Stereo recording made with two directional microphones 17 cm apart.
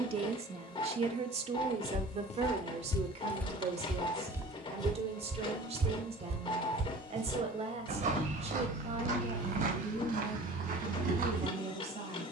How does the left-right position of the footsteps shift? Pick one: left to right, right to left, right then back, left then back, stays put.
left to right.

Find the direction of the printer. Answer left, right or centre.
left.